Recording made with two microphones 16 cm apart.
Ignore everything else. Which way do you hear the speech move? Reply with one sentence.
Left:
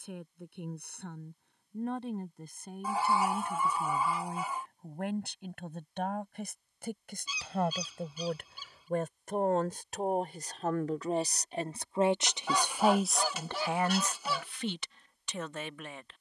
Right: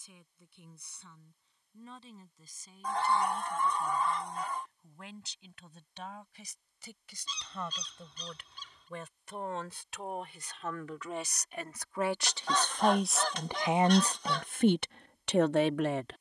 You can hear the speech move from left to right.